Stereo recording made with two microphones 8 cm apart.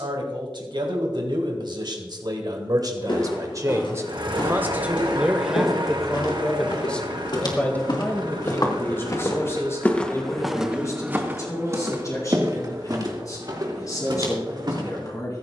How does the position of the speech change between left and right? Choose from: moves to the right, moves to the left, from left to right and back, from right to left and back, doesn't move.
moves to the left.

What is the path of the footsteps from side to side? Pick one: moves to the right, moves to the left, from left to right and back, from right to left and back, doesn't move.
moves to the right.